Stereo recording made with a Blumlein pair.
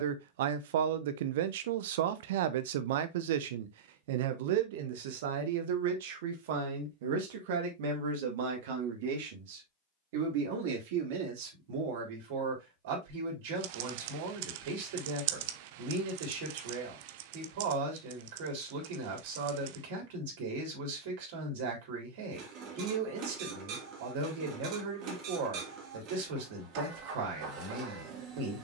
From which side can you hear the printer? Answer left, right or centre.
right.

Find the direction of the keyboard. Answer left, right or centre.
right.